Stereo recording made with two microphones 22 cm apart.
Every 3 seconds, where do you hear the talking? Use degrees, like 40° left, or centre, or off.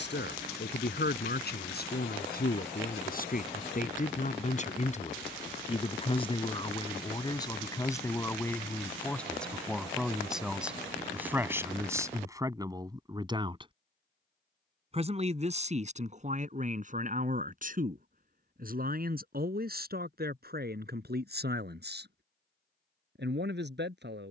50° left, 40° left, 20° left, centre, 20° right, 40° right, 50° right, 50° right.